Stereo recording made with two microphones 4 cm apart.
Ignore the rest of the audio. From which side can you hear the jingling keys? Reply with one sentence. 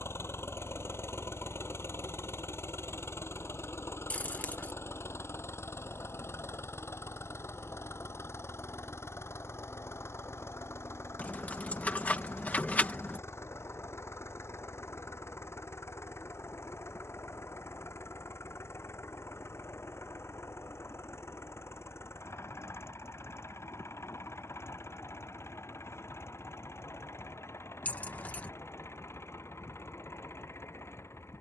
You can hear the jingling keys on the left.